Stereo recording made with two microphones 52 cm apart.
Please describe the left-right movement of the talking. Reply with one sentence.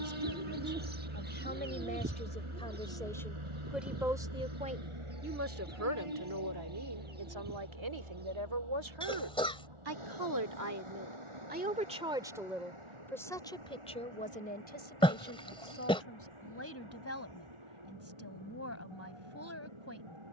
In this clip you hear the talking go right and come back.